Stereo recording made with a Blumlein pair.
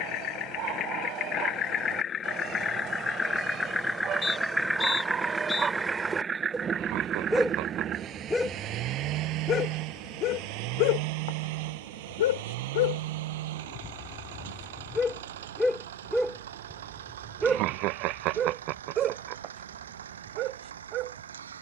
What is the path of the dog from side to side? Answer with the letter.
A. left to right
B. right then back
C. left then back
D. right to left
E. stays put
C.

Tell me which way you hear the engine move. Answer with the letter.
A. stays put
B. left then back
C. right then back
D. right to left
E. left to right
E.